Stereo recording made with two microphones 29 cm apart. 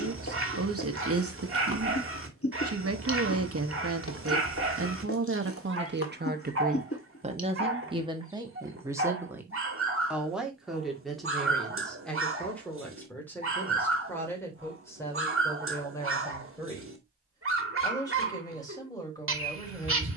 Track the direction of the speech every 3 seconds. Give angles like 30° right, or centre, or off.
50° right, 50° right, 20° right, centre, 10° left, 10° left, 10° left.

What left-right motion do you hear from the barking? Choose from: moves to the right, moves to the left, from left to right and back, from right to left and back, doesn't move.
doesn't move.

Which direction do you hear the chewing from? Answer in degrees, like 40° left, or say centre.
50° left.